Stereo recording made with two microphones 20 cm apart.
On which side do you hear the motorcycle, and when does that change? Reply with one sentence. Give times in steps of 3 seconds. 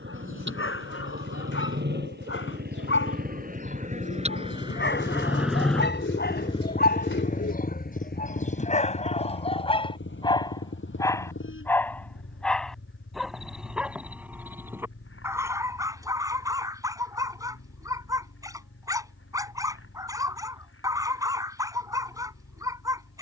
In this clip you hear the motorcycle on the right from 0 s and on the left from 6 s.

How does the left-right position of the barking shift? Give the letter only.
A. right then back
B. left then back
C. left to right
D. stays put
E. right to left
C.